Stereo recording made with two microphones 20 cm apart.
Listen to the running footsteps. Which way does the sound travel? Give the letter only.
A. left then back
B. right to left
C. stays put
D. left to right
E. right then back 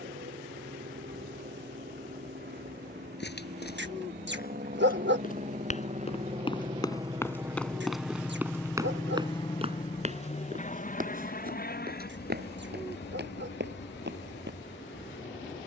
D.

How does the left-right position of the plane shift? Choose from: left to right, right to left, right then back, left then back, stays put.
right to left.